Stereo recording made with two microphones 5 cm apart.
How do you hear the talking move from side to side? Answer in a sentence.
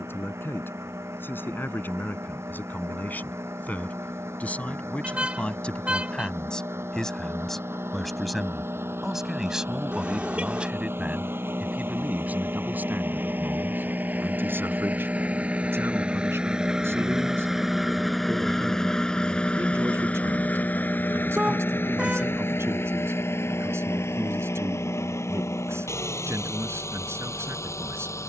You can hear the talking travel towards the right.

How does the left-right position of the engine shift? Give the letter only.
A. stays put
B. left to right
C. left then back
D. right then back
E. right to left
E.